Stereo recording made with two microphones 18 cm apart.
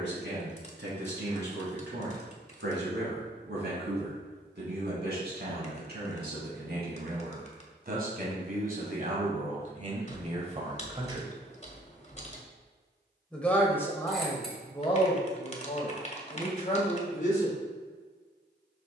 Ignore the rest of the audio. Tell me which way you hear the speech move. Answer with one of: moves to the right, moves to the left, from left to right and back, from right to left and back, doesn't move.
moves to the left.